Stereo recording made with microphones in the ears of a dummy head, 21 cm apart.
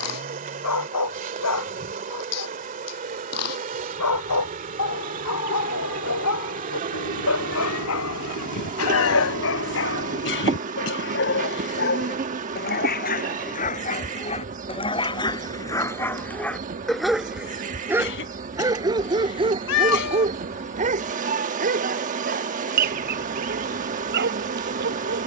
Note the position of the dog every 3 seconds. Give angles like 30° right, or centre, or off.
80° left, 70° left, 70° left, 60° left, 40° left, 10° left, 20° right, 40° right, 50° right.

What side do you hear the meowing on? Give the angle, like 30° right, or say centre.
70° left.